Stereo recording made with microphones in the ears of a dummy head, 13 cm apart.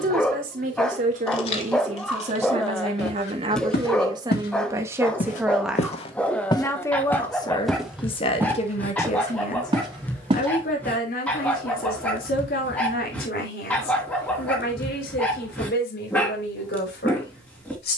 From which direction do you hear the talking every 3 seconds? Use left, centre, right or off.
right, right, left, left, left, left.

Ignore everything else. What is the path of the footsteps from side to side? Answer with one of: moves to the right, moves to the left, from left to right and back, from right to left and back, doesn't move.
moves to the right.